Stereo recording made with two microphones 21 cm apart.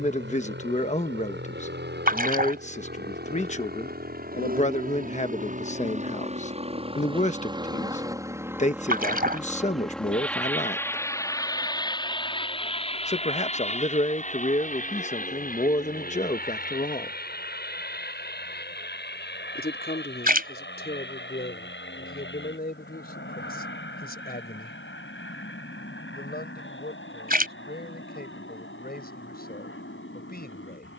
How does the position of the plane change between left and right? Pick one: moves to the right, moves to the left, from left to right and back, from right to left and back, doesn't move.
moves to the left.